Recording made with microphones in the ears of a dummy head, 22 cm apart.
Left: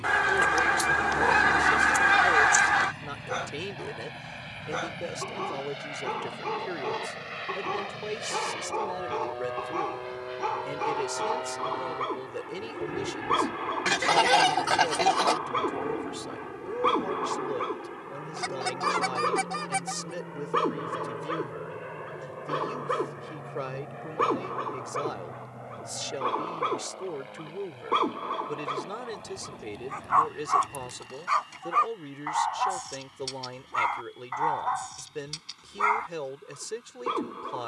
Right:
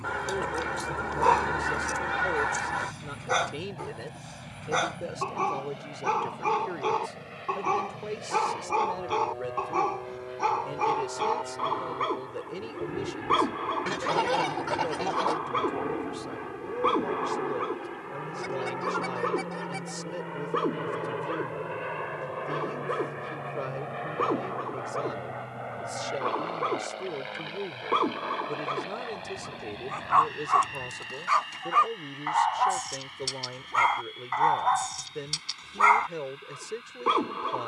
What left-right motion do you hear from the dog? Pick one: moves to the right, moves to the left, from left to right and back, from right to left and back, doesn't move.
from right to left and back.